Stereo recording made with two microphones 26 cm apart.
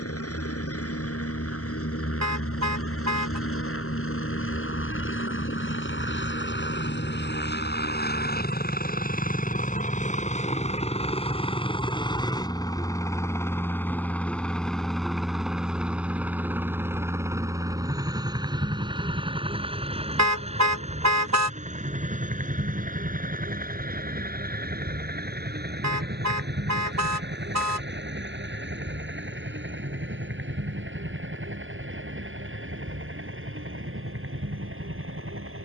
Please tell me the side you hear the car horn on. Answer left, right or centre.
right.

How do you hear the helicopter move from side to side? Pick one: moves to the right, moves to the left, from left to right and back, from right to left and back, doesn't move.
moves to the right.